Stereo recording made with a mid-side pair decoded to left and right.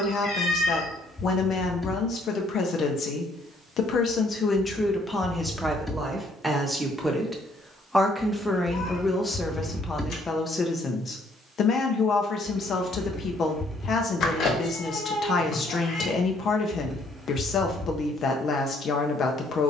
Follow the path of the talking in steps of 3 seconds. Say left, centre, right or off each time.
left, left, centre, left, left, left, left.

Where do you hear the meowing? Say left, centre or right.
left.